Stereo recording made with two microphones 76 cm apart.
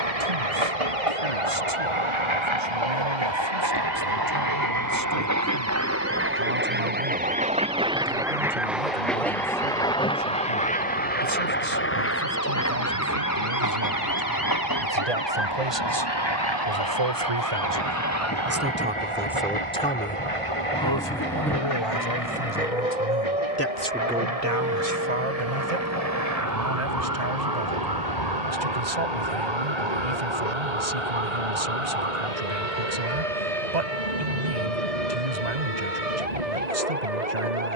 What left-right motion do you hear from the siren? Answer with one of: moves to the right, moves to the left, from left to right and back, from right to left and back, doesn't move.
moves to the right.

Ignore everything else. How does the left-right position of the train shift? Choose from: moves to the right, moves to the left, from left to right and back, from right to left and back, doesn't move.
moves to the left.